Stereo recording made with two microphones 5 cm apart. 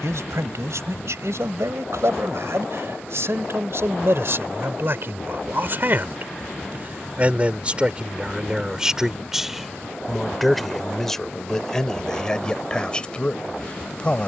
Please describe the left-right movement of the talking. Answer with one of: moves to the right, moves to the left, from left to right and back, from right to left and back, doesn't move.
moves to the left.